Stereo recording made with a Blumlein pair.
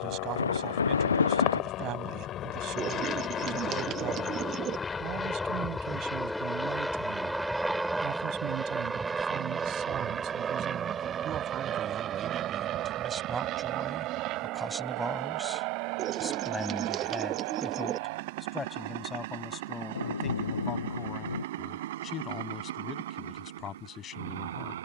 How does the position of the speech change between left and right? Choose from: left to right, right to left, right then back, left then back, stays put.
right to left.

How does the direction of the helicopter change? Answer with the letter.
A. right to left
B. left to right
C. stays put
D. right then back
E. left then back
B.